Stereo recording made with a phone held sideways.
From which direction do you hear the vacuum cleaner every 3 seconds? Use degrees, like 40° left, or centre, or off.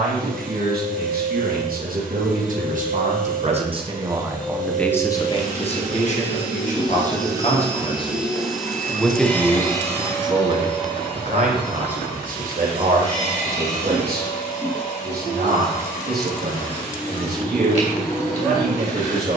60° right, 50° right, 20° right, 20° left, 40° left, 50° left, 50° left.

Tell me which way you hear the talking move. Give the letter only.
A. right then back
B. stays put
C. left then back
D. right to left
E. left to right
C.